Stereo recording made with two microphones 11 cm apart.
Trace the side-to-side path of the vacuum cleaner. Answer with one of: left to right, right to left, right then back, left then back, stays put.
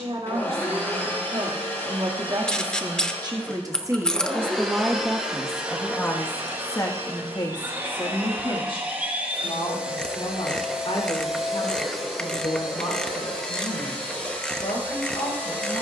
right then back.